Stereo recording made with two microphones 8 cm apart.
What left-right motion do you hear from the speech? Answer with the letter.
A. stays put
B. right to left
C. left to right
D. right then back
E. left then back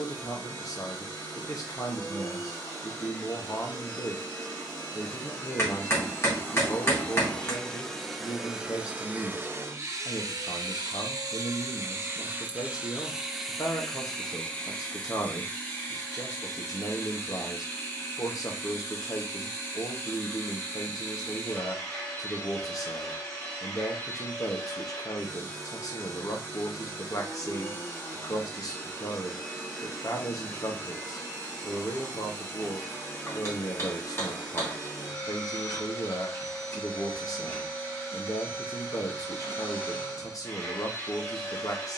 A.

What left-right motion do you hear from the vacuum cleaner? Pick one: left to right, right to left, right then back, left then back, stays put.
right then back.